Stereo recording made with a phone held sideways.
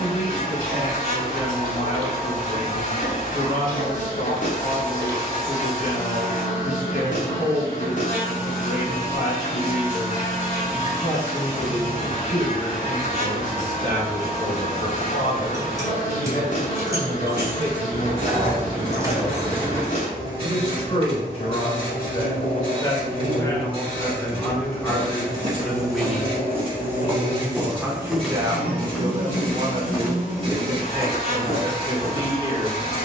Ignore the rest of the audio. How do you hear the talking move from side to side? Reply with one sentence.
You can hear the talking go from the left side to the right.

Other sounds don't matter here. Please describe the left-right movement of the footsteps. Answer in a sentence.
In this clip you hear the footsteps go from the right side to the left.